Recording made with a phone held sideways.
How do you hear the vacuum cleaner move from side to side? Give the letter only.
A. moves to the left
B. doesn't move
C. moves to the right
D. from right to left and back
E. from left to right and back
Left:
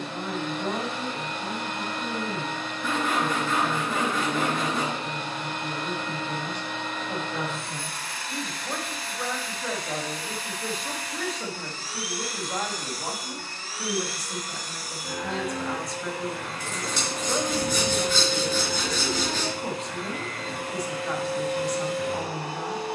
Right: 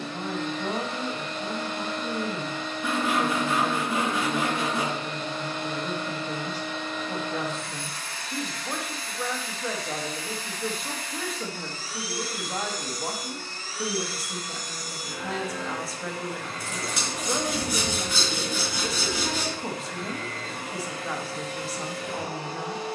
B.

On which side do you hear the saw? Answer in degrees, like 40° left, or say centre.
10° right.